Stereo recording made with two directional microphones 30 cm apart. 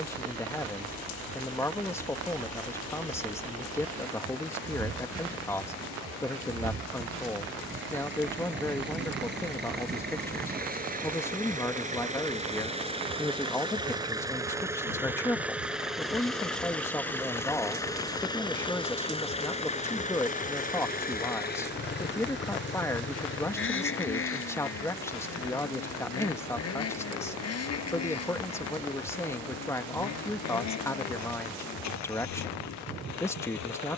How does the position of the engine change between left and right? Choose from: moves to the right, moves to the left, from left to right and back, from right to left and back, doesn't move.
moves to the left.